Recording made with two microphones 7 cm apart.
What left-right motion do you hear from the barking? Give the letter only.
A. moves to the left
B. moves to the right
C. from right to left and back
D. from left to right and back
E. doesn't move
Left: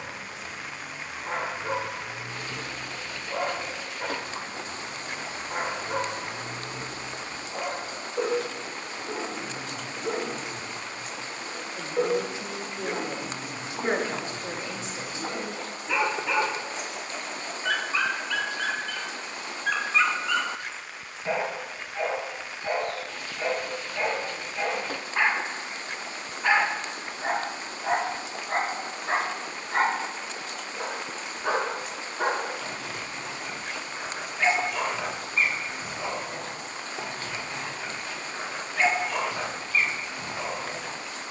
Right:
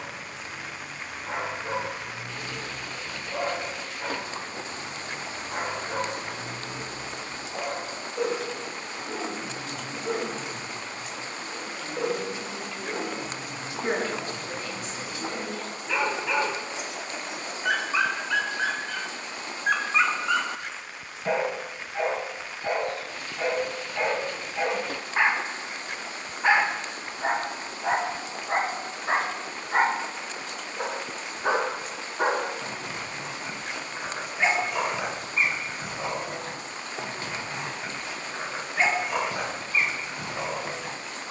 B.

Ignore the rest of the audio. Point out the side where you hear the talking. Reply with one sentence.
You can hear the talking on the left.